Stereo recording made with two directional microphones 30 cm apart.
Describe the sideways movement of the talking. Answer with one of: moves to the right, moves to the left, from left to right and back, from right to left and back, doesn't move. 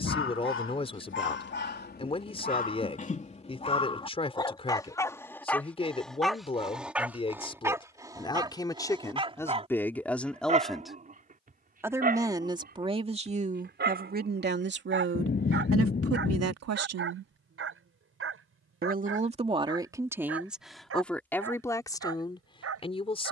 from left to right and back.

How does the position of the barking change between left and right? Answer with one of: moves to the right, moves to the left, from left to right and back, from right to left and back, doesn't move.
moves to the right.